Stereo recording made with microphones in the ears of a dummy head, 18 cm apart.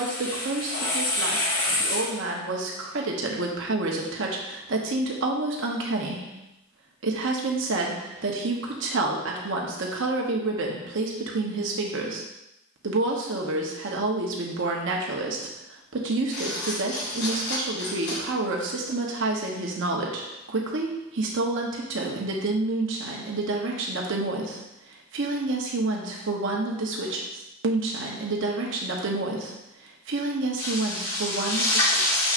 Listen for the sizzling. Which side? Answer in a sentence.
You can hear the sizzling on the left.